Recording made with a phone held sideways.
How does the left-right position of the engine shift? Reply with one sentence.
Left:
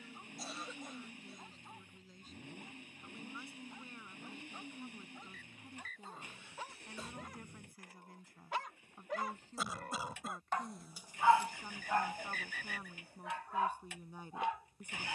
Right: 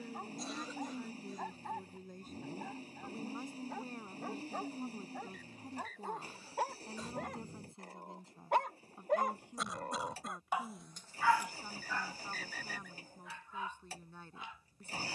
In this clip you hear the engine stay in one place.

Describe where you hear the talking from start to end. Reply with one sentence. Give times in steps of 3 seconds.
In this clip you hear the talking on the right from 0 s and in the centre from 9 s.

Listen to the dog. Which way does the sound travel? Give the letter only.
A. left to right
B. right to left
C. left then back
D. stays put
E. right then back
B.